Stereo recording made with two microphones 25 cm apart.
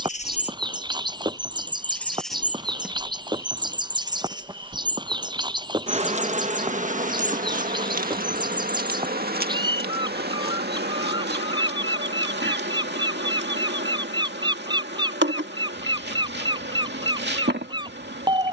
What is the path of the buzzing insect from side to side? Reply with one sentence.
You can hear the buzzing insect move to the right.